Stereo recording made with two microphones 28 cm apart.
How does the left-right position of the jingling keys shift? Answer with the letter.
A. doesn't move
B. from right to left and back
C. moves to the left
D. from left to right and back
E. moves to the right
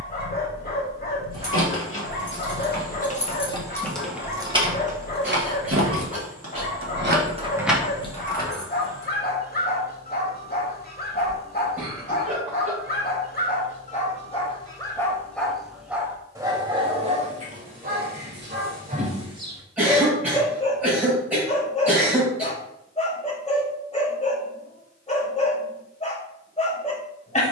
D.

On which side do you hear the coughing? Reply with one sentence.
In this clip you hear the coughing in the centre.